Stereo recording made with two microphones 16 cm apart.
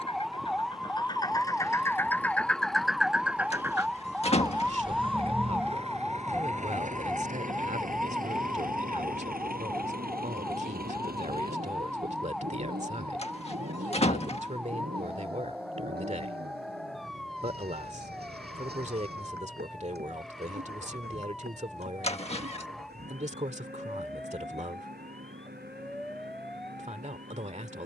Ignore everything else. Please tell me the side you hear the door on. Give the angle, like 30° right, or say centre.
40° left.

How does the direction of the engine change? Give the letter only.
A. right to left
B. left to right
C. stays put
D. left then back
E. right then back
B.